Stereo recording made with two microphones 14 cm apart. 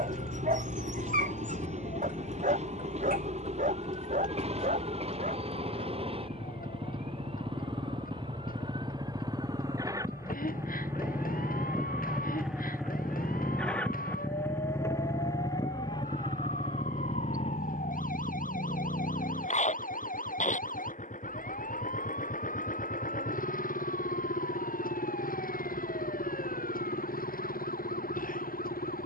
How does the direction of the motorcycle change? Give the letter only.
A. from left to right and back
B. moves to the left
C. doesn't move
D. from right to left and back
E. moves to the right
B.